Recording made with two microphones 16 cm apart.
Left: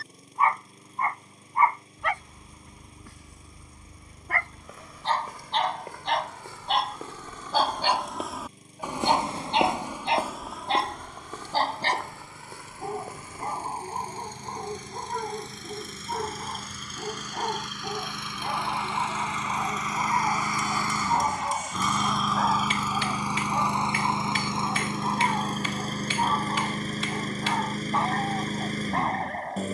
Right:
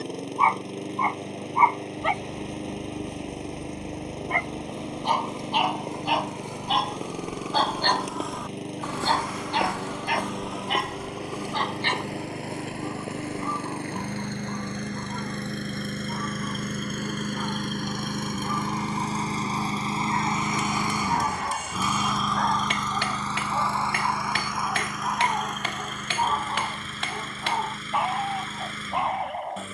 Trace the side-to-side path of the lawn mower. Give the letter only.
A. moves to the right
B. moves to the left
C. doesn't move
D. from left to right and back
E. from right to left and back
B.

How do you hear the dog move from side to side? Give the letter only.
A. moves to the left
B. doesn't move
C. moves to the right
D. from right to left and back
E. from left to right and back
D.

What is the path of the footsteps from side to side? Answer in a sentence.
In this clip you hear the footsteps go left and come back.